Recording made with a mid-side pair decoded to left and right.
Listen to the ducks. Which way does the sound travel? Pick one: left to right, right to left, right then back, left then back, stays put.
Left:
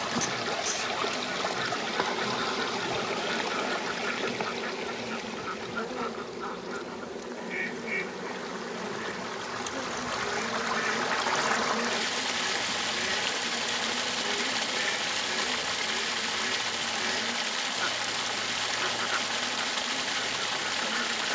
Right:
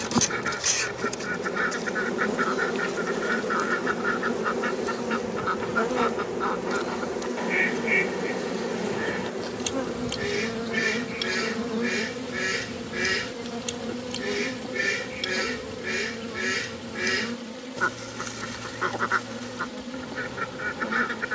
stays put.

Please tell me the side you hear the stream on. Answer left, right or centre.
left.